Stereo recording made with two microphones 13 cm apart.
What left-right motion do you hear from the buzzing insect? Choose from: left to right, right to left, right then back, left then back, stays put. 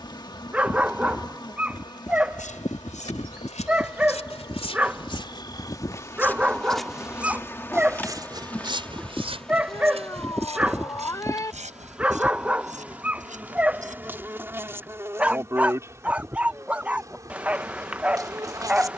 left to right.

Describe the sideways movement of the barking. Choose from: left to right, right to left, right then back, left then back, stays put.
stays put.